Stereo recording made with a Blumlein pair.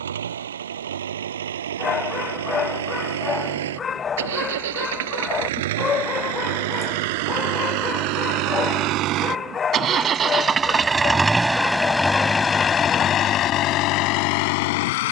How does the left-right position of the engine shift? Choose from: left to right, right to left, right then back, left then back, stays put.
right to left.